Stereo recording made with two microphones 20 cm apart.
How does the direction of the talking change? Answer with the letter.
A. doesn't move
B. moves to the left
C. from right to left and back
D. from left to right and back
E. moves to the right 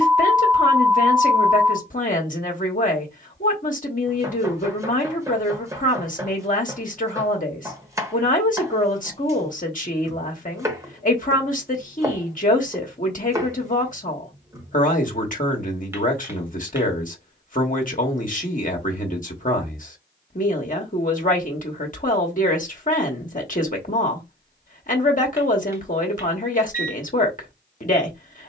A.